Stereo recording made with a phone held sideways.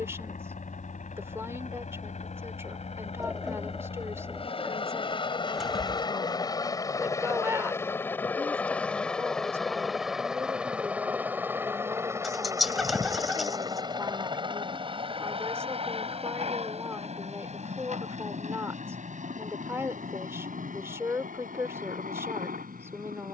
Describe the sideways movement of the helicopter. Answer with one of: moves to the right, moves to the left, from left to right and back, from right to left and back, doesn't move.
moves to the right.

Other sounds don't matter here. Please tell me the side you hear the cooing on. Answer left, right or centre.
centre.